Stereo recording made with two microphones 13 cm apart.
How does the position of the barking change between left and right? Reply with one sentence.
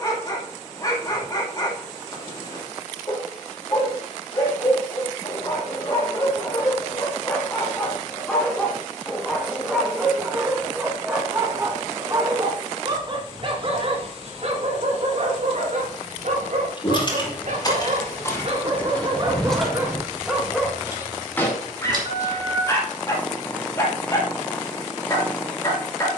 You can hear the barking move from left to right and back again.